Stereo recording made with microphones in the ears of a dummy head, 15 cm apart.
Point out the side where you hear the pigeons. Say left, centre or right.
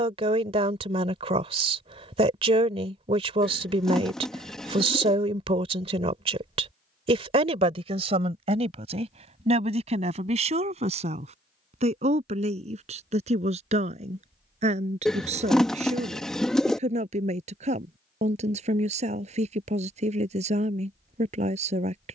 centre.